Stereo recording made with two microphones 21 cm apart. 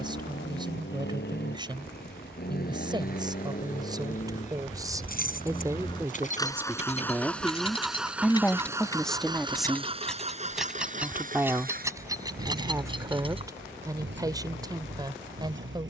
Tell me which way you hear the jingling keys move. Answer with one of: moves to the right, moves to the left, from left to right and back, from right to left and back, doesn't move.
moves to the right.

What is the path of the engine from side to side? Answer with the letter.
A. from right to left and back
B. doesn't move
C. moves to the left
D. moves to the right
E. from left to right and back
D.